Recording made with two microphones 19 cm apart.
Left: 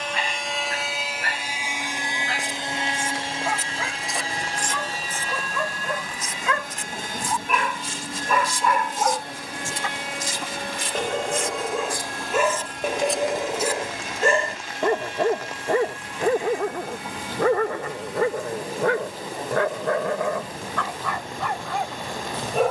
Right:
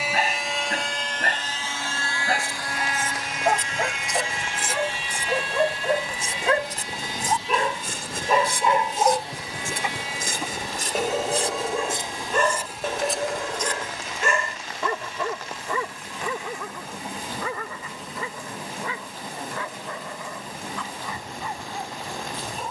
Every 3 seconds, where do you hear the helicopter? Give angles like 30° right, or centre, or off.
10° left, 40° left, 50° left, 60° left, 60° left, 70° left, 70° left, 70° left.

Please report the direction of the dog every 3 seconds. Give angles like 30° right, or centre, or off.
50° right, 40° right, 30° right, 10° right, 20° left, 50° left, 70° left, 80° left.